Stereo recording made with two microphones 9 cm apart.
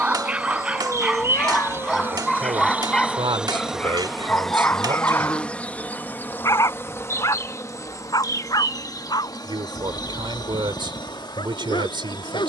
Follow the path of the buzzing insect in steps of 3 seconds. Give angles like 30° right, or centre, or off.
30° right, centre, 30° left, 50° left.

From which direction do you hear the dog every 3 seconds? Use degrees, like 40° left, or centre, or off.
centre, 20° left, 40° left, 60° left.